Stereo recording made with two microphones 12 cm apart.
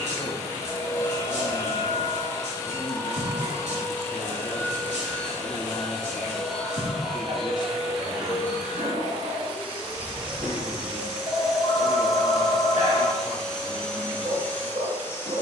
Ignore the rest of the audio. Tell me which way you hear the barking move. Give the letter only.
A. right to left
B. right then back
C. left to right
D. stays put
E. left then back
D.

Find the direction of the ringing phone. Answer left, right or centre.
left.